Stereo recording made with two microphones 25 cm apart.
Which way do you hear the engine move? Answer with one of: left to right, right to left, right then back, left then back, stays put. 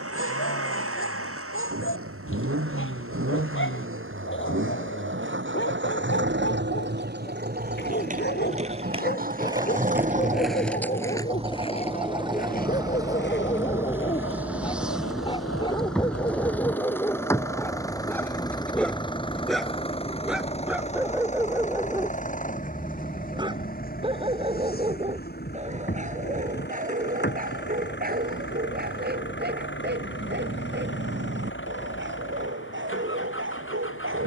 right to left.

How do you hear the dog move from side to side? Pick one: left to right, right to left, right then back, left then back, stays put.
left to right.